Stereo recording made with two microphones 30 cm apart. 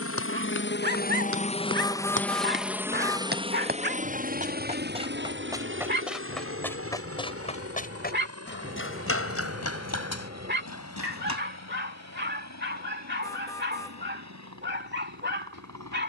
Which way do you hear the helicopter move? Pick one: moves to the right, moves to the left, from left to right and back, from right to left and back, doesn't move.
moves to the right.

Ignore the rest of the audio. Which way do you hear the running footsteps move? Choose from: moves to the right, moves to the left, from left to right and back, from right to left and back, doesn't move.
moves to the left.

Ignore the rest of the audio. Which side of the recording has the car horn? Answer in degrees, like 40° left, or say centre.
10° left.